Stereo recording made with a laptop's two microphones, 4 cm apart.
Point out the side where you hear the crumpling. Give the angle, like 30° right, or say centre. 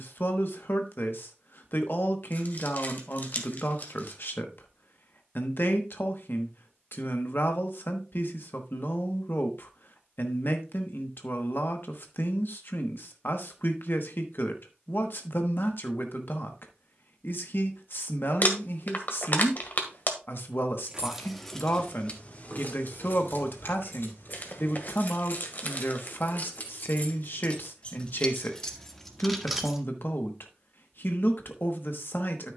40° left.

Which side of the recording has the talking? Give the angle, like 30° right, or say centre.
50° left.